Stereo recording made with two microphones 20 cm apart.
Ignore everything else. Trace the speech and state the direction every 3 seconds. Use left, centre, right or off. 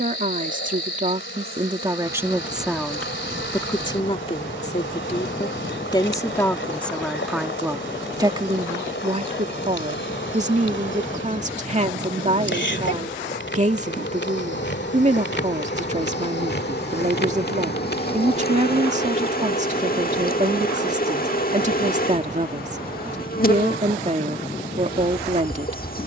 right, left, centre, right, right, right, right, right, right.